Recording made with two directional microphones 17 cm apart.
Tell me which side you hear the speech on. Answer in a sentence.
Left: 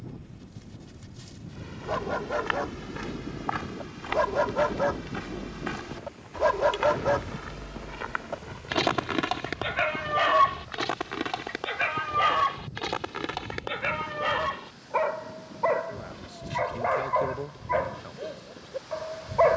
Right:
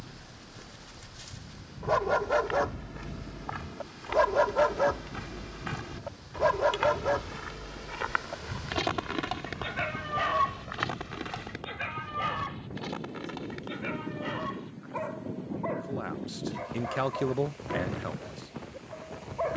You can hear the speech on the right.